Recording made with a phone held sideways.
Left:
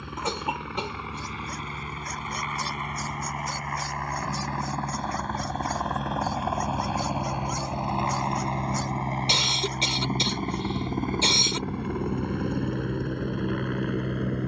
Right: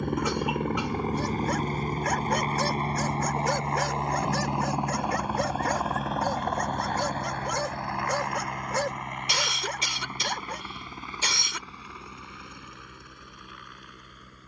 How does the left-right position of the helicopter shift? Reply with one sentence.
You can hear the helicopter move to the left.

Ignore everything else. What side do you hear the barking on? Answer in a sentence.
In this clip you hear the barking on the right.